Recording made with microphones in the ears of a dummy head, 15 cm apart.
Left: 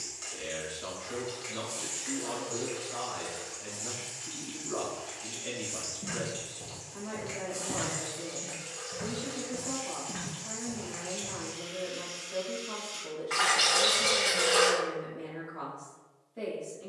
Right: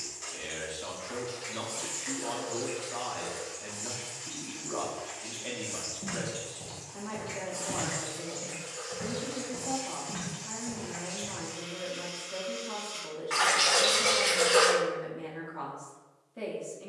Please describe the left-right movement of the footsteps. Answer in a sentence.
You can hear the footsteps go left and come back.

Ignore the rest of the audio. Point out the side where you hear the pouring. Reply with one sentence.
In this clip you hear the pouring in the centre.